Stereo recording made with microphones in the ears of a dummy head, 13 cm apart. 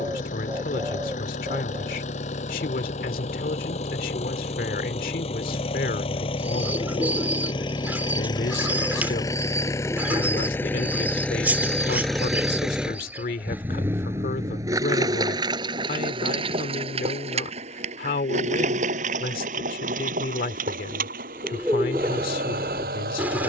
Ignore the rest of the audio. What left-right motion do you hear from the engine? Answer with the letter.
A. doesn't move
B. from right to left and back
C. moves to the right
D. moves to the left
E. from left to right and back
C.